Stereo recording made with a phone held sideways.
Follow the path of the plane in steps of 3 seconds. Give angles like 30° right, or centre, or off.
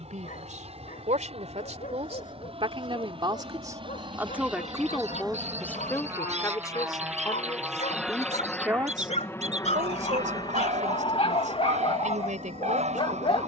50° right, 40° right, 10° right, 30° left, 50° left.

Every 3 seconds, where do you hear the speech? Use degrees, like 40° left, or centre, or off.
60° right, 10° right, 20° left, 70° right, 70° right.